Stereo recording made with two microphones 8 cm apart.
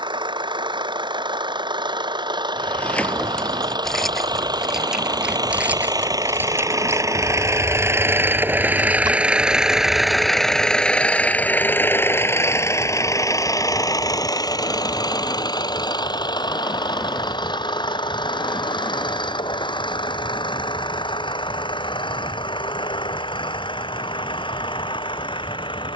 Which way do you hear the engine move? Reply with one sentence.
You can hear the engine go from the right side to the left.